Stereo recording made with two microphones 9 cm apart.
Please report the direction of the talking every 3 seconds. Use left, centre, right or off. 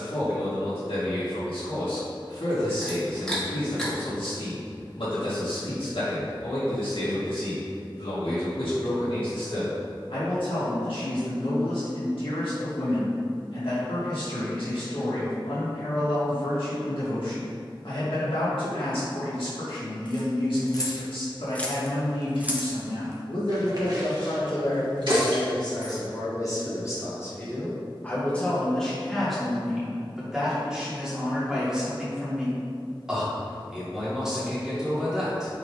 left, left, left, left, left, left, left, left, left, centre, centre, centre.